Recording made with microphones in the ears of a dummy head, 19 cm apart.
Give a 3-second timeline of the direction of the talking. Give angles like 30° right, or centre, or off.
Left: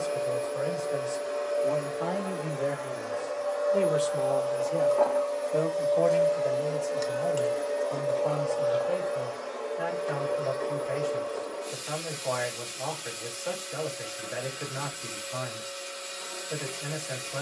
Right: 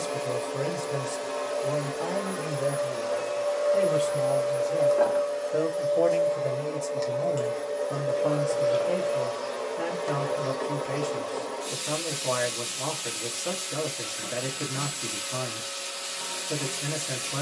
10° right, 10° left, 40° right, 50° right, 50° right, 50° right.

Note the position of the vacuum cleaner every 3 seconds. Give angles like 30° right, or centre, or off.
60° right, 30° right, centre, 60° right, 60° right, 60° right.